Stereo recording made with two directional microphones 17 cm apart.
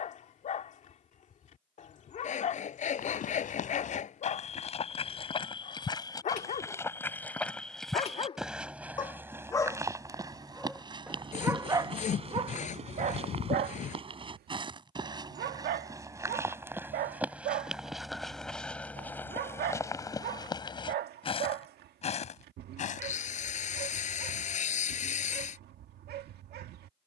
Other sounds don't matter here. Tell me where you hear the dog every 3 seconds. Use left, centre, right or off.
left, left, left, centre, right, right, right, right, right.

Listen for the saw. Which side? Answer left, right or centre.
left.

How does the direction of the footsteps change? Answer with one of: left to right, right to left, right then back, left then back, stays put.
right then back.